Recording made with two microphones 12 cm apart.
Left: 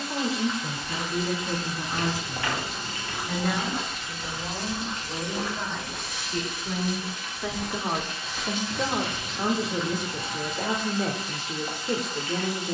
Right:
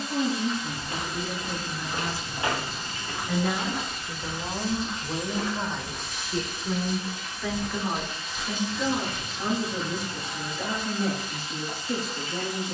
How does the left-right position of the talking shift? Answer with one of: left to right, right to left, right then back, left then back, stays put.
right then back.